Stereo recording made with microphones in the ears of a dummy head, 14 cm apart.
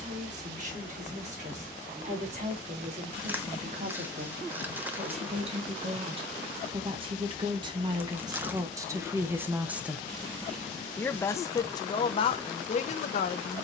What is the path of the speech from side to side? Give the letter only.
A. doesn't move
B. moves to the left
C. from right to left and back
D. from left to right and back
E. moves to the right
B.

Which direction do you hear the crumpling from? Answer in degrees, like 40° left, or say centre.
10° right.